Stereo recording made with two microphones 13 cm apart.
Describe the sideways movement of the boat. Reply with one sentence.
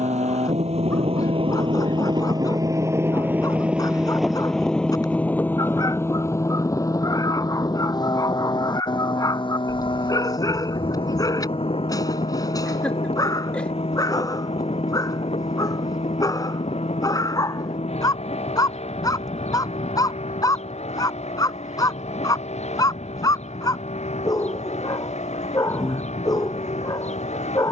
You can hear the boat move to the left.